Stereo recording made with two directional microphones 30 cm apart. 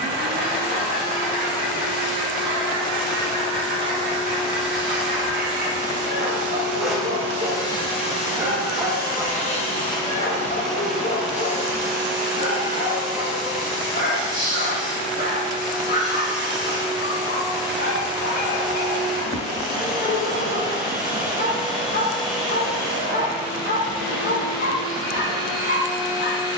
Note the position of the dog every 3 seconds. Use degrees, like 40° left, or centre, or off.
40° right, 40° right, 20° right, 20° left, 30° left, 30° left, 30° left, 30° left, 30° left.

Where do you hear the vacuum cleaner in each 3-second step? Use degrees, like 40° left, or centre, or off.
20° right, 20° right, 10° left, 10° left, 10° right, 10° right, 10° right, 10° right, 10° right.